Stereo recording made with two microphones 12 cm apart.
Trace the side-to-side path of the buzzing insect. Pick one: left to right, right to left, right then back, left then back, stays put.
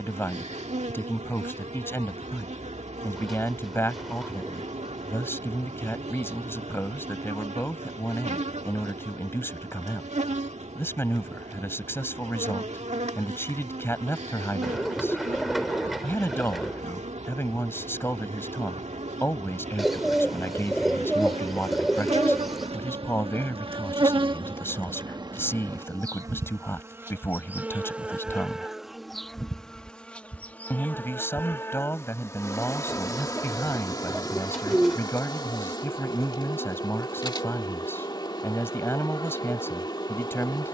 right to left.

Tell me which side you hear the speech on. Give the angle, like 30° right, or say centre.
20° left.